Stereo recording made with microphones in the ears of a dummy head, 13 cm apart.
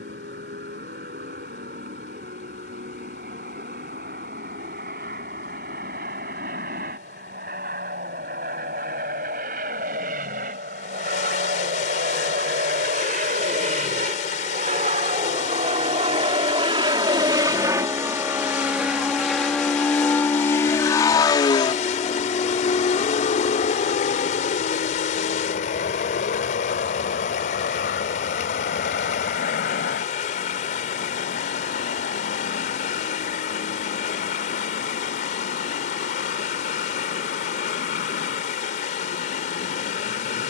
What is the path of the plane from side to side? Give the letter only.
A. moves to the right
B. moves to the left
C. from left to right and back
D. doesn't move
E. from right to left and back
B.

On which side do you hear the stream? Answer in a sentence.
You can hear the stream on the left.